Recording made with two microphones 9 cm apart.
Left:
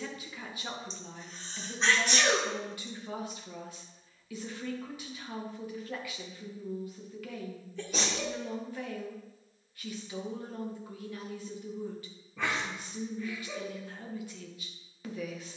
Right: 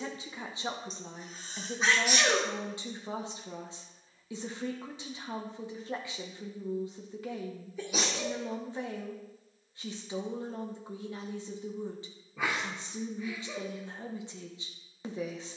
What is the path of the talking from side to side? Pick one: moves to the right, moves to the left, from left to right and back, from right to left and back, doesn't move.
doesn't move.